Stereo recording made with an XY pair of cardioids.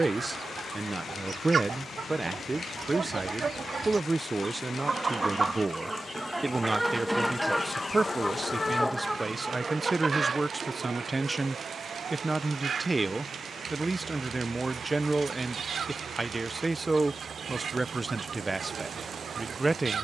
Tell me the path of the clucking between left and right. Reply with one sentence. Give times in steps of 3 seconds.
You can hear the clucking on the right from 0 s, in the centre from 6 s and on the right from 9 s.